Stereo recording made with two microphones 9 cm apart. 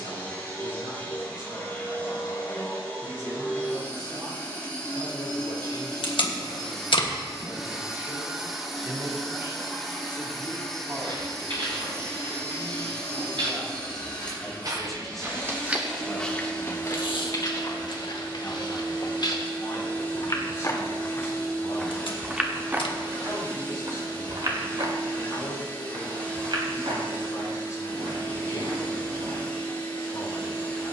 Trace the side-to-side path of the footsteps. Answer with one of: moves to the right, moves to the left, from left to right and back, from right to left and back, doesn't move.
from right to left and back.